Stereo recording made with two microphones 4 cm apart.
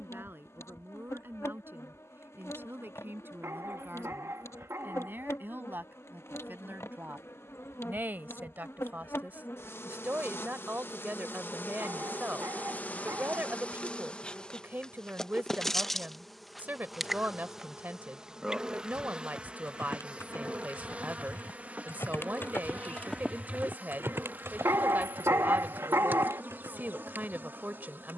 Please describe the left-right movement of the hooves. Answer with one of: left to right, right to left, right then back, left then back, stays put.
left to right.